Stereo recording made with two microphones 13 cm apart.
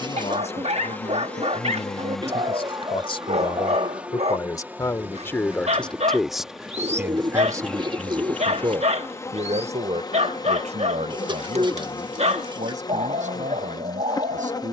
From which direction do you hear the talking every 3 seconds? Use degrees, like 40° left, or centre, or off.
50° left, 30° left, 20° right, 60° right, 80° right.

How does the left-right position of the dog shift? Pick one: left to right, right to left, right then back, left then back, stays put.
stays put.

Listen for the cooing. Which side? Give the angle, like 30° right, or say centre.
40° right.